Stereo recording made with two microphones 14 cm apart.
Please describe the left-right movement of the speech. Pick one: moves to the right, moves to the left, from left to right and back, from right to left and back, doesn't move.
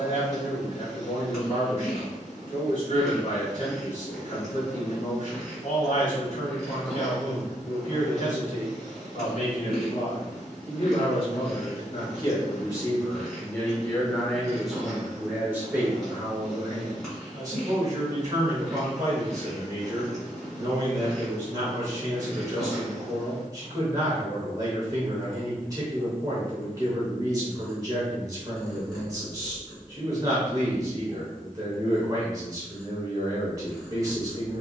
moves to the right.